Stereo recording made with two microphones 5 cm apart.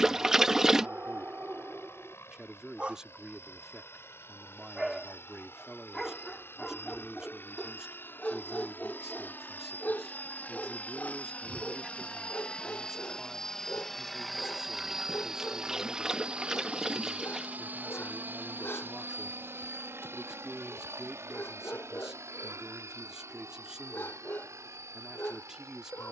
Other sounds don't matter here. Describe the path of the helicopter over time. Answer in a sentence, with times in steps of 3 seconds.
In this clip you hear the helicopter on the left from 0 s, in the centre from 12 s and on the right from 15 s.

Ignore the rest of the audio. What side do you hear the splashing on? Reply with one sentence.
You can hear the splashing in the centre.